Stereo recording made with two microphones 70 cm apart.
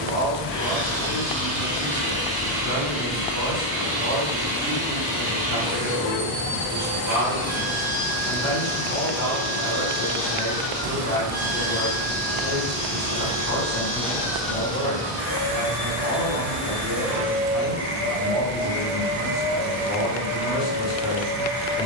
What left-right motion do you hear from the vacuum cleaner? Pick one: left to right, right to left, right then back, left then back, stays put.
left then back.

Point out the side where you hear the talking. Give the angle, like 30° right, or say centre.
30° right.